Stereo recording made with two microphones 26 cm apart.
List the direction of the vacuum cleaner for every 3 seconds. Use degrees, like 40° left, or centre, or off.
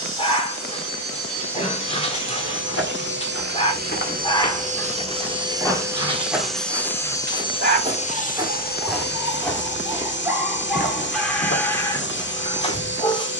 50° right, 30° right, 20° left, 50° left, 50° left.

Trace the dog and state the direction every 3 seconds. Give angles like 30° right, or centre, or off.
20° left, 10° left, 30° right, centre, 20° left.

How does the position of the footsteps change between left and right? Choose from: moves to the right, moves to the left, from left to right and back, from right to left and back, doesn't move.
from left to right and back.